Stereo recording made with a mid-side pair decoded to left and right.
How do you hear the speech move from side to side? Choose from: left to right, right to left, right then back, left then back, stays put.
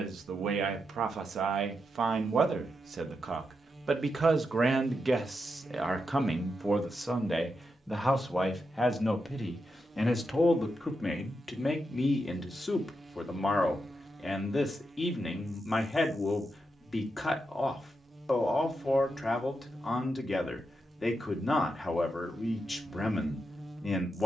right to left.